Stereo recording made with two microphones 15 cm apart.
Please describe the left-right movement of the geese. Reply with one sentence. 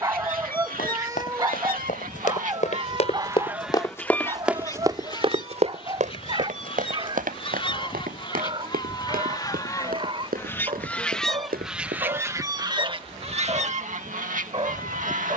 In this clip you hear the geese go left and come back.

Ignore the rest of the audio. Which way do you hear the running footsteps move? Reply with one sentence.
You can hear the running footsteps go from the left side to the right.